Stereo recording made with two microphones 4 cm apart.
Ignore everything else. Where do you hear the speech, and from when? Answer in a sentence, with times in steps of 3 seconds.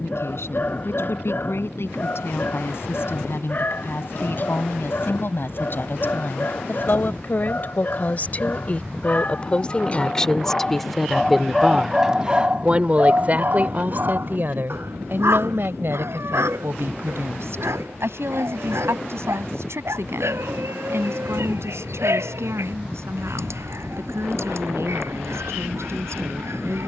In this clip you hear the speech on the left from 0 s, in the centre from 9 s and on the right from 12 s.